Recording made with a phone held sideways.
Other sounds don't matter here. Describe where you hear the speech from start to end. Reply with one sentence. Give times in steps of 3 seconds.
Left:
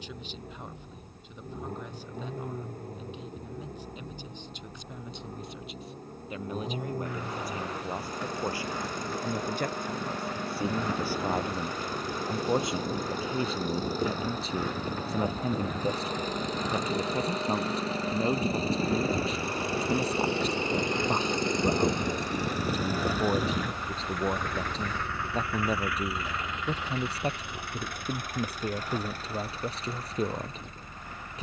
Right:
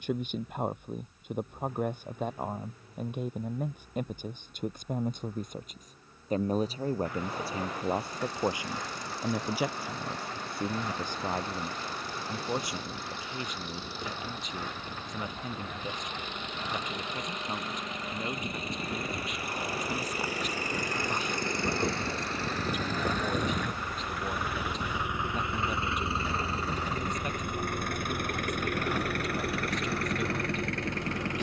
You can hear the speech on the right from 0 s, in the centre from 9 s and on the left from 12 s.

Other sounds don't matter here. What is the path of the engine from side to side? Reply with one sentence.
You can hear the engine travel towards the right.